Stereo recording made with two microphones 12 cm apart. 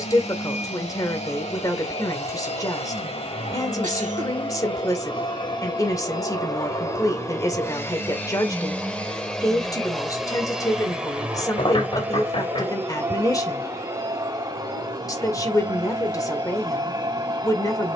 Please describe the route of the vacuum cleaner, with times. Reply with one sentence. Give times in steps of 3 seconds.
You can hear the vacuum cleaner on the left from 0 s, in the centre from 9 s and on the right from 12 s.